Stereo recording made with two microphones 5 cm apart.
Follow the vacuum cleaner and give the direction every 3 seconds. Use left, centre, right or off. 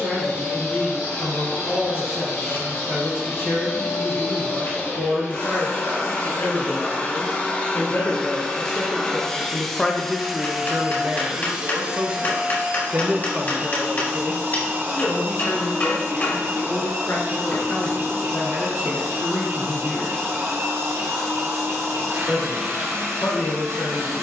left, left, left, centre, right, right, right, right.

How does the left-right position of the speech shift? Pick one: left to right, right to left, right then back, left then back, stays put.
right then back.